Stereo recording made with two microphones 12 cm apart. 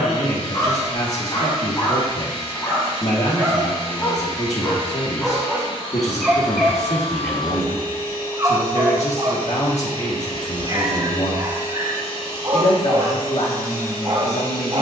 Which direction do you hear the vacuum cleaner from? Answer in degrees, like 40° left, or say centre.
50° left.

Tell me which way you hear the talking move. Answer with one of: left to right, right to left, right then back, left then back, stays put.
stays put.